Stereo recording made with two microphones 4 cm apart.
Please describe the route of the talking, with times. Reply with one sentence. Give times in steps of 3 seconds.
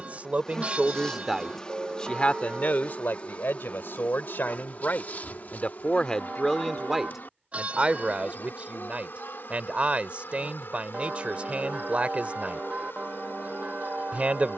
In this clip you hear the talking in the centre from 0 s, on the left from 3 s, in the centre from 6 s and on the right from 9 s.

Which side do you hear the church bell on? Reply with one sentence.
You can hear the church bell on the right.